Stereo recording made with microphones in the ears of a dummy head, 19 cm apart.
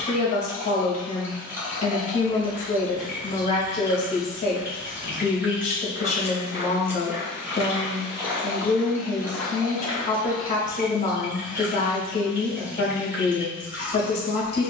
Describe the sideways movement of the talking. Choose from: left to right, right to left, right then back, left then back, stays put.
stays put.